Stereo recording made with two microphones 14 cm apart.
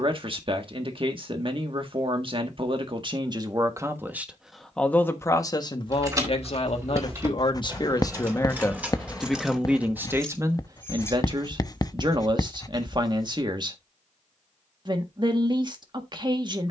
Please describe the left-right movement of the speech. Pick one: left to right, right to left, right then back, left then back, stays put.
left then back.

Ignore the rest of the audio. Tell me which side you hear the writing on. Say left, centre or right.
left.